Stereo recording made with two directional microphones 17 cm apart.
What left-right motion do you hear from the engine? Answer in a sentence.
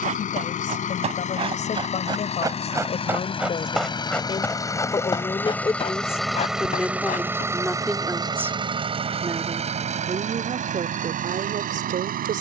In this clip you hear the engine go from the left side to the right.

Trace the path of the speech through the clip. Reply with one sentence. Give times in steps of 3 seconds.
You can hear the speech on the left from 0 s, in the centre from 6 s and on the right from 9 s.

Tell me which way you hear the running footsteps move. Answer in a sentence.
In this clip you hear the running footsteps go from the right side to the left.